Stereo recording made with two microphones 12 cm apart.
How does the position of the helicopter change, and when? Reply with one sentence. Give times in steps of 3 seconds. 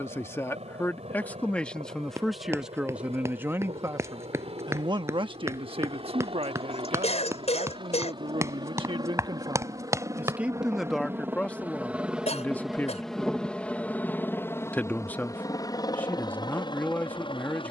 In this clip you hear the helicopter on the right from 0 s, in the centre from 12 s and on the left from 15 s.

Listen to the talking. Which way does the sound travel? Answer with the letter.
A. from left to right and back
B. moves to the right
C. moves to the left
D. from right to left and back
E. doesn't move
A.